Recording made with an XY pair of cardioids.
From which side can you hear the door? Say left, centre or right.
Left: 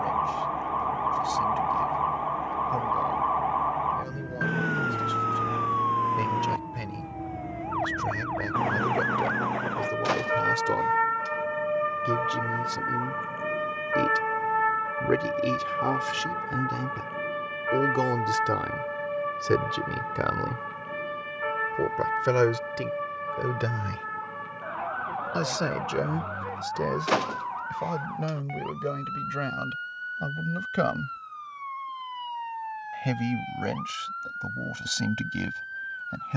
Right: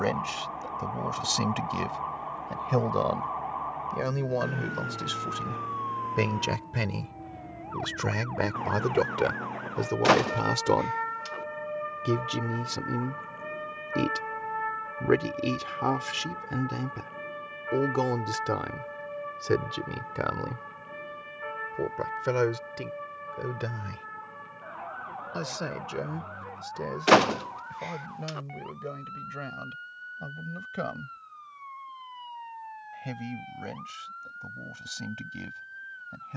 right.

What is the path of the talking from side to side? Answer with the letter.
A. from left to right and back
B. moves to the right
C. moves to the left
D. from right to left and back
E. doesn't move
C.